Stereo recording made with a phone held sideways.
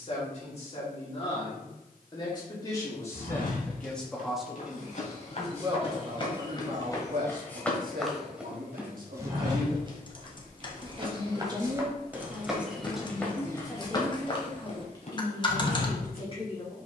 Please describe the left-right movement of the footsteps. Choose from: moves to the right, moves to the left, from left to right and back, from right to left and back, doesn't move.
from left to right and back.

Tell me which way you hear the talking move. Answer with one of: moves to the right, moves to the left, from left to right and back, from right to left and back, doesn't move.
from left to right and back.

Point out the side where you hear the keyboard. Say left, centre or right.
left.